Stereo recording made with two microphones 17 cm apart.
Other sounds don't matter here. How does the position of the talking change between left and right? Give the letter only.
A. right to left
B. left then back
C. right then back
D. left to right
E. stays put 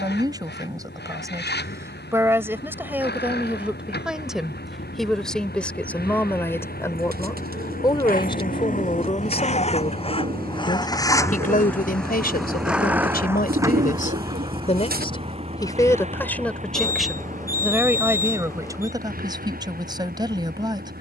B.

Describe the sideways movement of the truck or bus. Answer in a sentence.
In this clip you hear the truck or bus move to the right.